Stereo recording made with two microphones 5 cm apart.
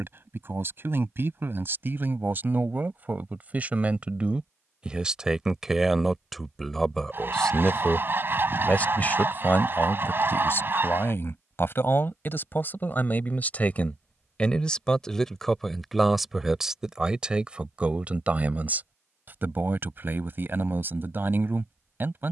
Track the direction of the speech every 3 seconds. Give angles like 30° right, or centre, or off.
50° right, 20° right, 10° left, 40° left, 30° left, 10° right, 40° right, 50° right.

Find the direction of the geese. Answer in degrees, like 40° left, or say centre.
40° right.